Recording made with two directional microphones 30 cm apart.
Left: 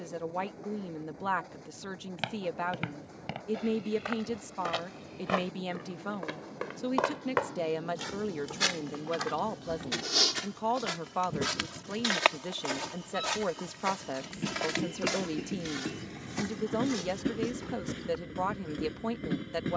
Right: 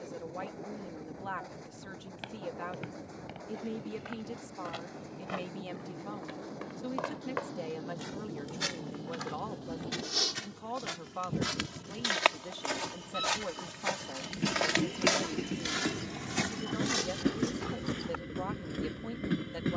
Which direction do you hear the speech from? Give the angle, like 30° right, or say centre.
50° left.